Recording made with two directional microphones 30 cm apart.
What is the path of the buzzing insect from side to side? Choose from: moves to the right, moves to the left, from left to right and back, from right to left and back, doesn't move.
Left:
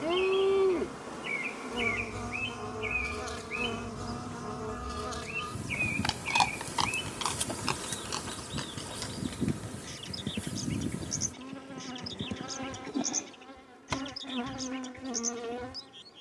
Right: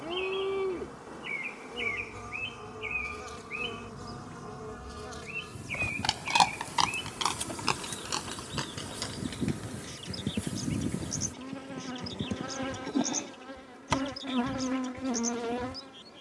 moves to the right.